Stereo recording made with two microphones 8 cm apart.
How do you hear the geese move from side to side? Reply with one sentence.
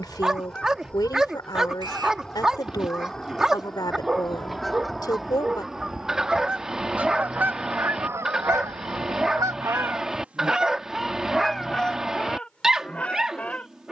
In this clip you hear the geese go right and come back.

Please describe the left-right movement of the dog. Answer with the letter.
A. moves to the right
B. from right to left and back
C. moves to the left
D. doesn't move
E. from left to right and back
D.